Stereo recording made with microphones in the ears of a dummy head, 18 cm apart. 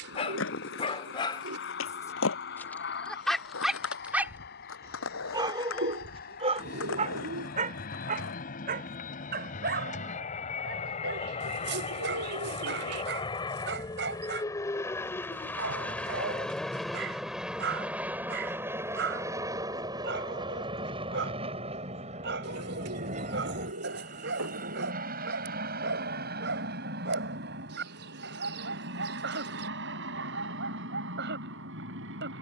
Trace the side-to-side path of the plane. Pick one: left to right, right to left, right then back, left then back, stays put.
left to right.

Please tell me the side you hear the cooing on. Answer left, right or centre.
right.